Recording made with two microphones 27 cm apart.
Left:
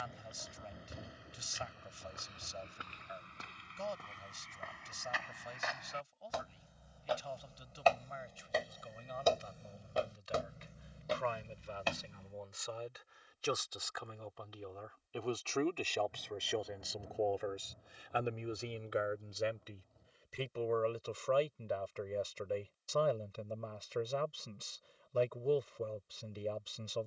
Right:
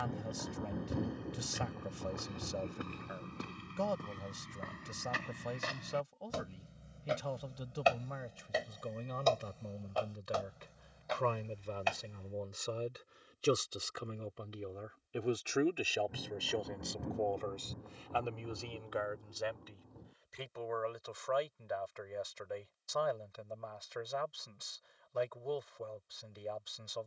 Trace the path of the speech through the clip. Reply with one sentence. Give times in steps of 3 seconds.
In this clip you hear the speech on the right from 0 s, in the centre from 15 s and on the left from 18 s.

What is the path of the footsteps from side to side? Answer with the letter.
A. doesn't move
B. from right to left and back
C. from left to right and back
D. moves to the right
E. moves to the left
E.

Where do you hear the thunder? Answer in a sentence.
You can hear the thunder on the right.